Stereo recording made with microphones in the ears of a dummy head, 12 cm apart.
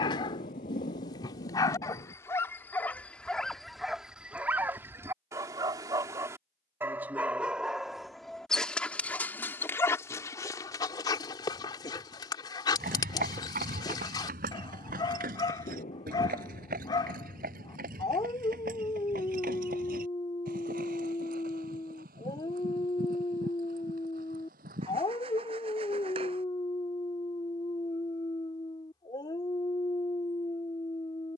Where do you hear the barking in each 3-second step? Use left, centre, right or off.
left, centre, centre, left, left, left, left, left, left, left, left.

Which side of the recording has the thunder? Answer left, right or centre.
left.